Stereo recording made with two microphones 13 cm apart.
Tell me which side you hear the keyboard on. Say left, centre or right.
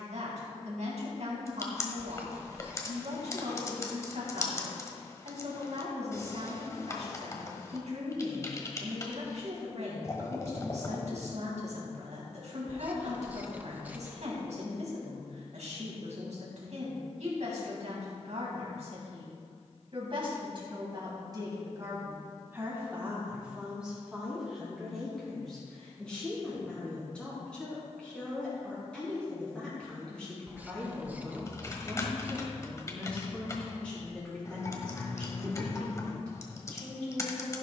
left.